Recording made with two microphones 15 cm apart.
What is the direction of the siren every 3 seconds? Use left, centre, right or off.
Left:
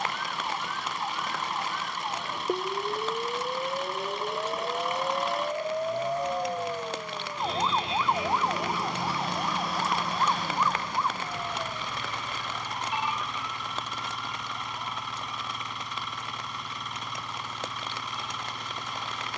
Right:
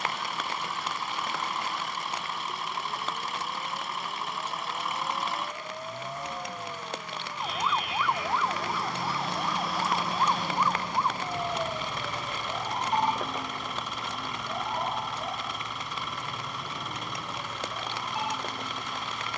left, left, left, centre, right, right, right.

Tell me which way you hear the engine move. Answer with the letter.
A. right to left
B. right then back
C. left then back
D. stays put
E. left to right
D.